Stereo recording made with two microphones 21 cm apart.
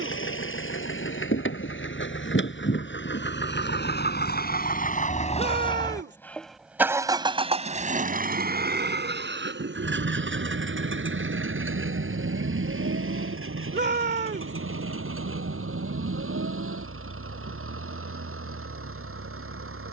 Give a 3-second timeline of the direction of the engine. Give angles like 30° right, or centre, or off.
70° left, 40° left, 30° right, 60° right, 80° right, 80° right, 80° right.